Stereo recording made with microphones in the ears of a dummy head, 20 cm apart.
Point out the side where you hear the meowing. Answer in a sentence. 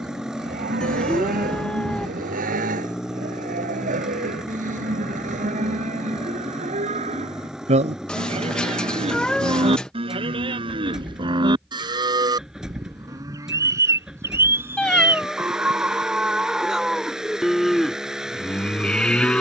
In this clip you hear the meowing in the centre.